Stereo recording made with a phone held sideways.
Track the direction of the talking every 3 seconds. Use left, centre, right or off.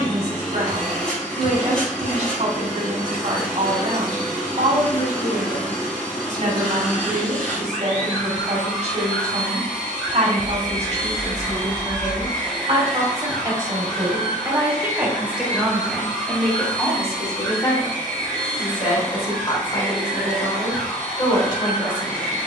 right, right, right, right, right, centre, left, left.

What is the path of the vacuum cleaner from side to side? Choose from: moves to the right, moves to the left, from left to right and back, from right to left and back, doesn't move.
doesn't move.